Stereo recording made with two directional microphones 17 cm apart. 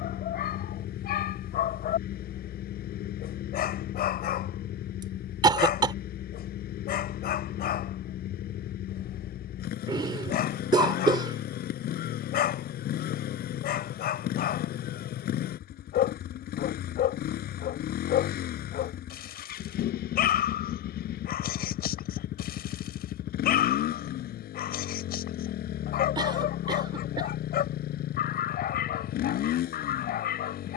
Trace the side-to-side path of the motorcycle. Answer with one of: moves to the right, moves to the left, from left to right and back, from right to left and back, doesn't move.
doesn't move.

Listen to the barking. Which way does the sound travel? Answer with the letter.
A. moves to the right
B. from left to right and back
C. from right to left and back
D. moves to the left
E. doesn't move
E.